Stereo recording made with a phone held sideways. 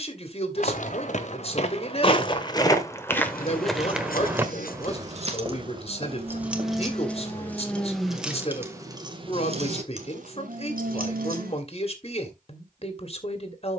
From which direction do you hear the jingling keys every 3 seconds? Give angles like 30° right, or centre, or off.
off, 50° right, centre, 60° right, off.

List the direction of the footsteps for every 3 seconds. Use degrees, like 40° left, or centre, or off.
40° left, 10° right, 40° right, off, off.